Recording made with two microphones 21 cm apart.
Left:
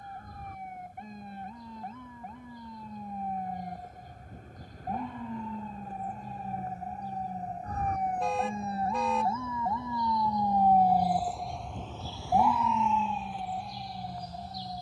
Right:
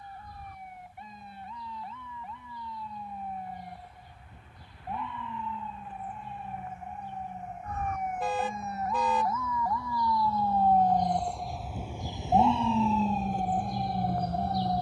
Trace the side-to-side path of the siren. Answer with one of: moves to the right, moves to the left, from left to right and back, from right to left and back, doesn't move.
moves to the right.